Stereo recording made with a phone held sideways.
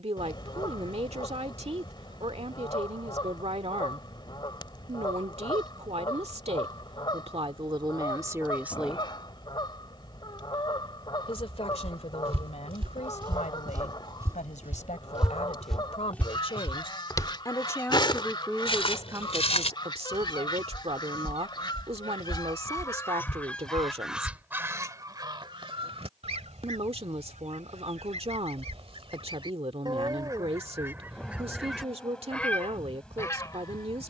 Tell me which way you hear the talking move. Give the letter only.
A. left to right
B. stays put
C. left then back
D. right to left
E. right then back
C.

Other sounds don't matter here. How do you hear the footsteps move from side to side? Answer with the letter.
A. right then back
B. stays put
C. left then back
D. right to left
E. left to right
D.